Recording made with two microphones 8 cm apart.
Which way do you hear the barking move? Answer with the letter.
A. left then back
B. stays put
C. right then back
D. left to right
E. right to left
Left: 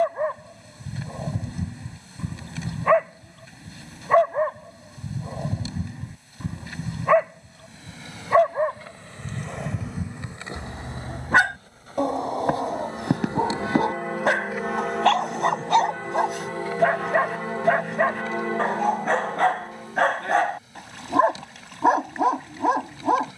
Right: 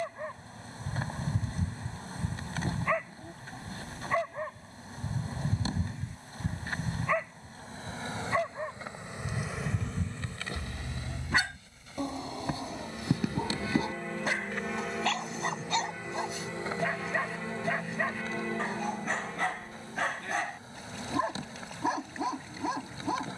B.